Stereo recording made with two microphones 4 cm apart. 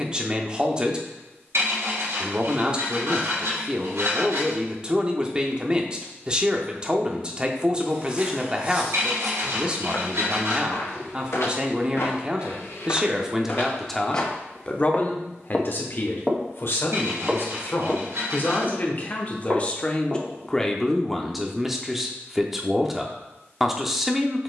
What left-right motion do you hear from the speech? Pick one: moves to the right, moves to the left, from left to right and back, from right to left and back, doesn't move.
from right to left and back.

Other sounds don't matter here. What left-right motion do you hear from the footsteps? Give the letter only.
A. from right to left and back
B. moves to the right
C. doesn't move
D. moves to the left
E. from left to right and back
A.